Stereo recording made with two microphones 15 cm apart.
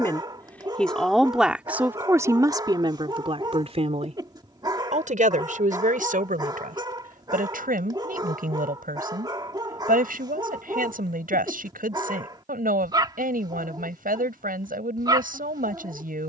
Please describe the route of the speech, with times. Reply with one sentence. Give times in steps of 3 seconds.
You can hear the speech in the centre from 0 s and on the right from 3 s.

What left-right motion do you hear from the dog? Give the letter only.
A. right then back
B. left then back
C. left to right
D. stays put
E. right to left
D.